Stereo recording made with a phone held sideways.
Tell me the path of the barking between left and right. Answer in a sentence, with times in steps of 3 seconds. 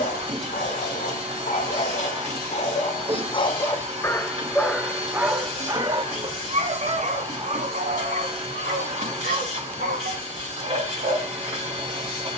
You can hear the barking on the left from 0 s, in the centre from 3 s and on the right from 6 s.